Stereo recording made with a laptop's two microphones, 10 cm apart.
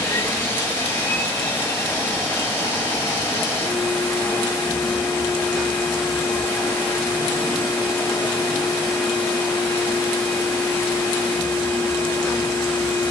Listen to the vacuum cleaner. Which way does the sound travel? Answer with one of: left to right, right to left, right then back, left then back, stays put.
stays put.